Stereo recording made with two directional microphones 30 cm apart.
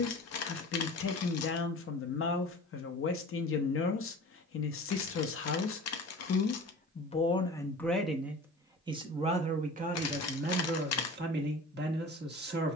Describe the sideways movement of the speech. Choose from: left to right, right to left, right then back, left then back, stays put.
left to right.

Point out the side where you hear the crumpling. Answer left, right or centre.
left.